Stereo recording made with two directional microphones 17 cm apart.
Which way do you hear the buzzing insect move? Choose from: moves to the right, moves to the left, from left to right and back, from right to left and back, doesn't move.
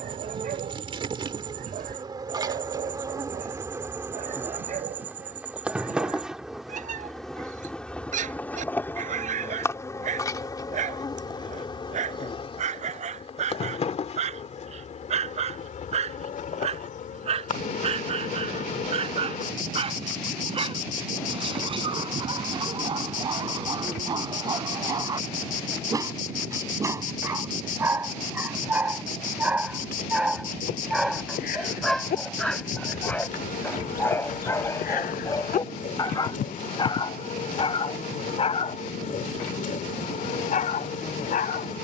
moves to the left.